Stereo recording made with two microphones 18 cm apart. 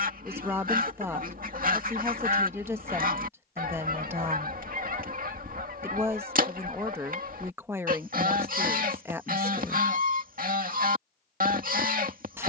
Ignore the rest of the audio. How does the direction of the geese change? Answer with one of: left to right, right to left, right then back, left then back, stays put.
stays put.